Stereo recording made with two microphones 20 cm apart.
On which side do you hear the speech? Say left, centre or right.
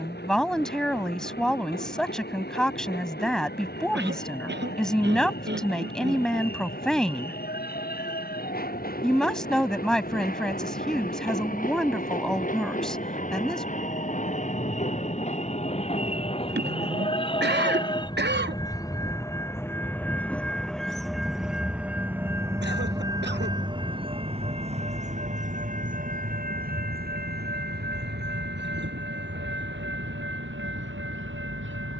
centre.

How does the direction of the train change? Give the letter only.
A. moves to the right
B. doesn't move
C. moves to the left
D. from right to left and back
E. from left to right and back
A.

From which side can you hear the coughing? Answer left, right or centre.
right.